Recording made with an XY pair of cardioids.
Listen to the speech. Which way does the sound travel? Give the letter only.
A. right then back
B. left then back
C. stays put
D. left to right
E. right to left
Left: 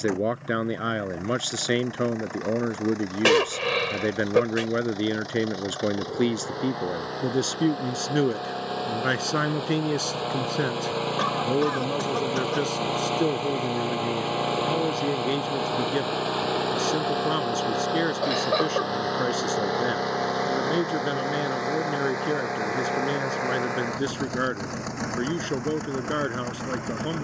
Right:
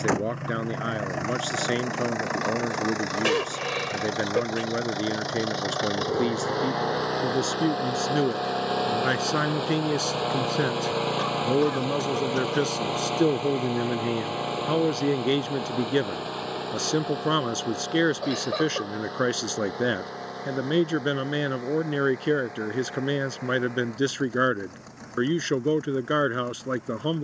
D.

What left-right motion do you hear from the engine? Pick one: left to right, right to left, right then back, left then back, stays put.
right to left.